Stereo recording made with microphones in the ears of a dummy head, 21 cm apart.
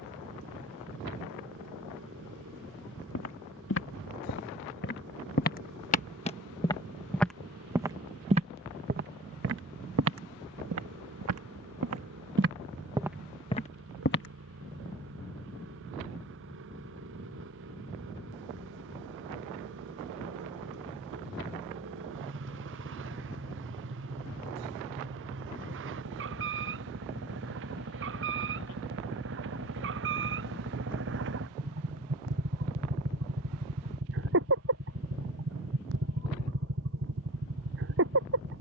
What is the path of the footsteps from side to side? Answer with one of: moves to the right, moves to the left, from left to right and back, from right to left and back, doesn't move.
from left to right and back.